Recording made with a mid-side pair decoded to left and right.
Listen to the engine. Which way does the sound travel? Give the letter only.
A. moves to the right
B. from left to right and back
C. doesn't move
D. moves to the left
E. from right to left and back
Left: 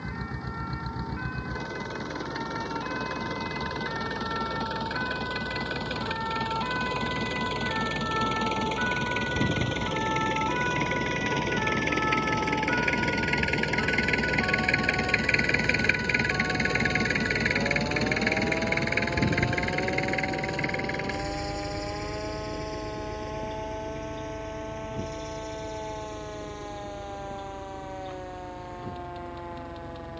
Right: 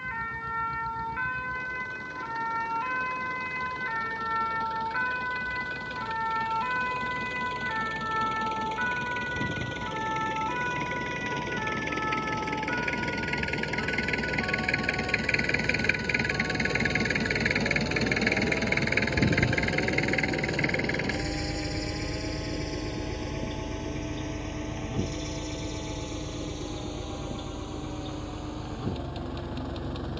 A.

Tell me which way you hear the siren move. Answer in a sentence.
In this clip you hear the siren go from the right side to the left.